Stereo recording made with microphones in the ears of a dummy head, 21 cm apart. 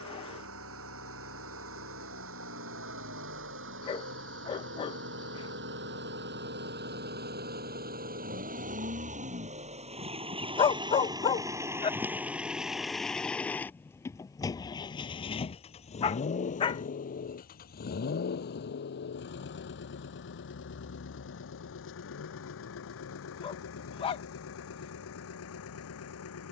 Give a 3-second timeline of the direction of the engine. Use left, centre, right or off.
right, right, right, right, centre, left, left, left, left.